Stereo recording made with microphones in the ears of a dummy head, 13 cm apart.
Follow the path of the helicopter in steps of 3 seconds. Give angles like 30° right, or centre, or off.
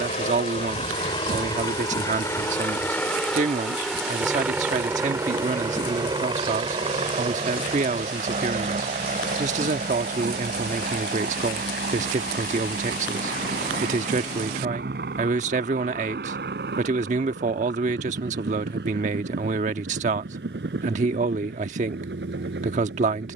30° left, 10° right, 40° right, 50° right, 60° right, 70° right, 70° right, 70° right.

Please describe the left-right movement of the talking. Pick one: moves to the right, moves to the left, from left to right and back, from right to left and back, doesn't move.
doesn't move.